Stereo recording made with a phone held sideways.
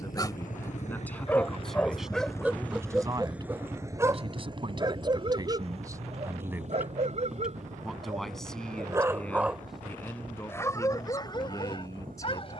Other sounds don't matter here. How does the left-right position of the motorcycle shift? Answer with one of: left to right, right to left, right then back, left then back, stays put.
left to right.